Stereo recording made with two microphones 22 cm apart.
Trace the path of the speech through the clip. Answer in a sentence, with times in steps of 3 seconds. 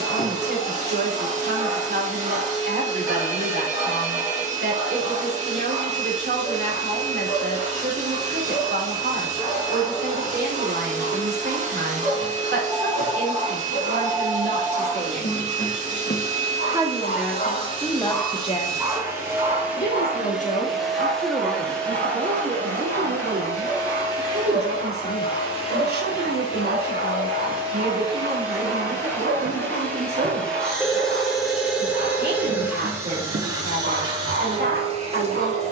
You can hear the speech on the right from 0 s, in the centre from 15 s, on the left from 18 s and on the right from 21 s.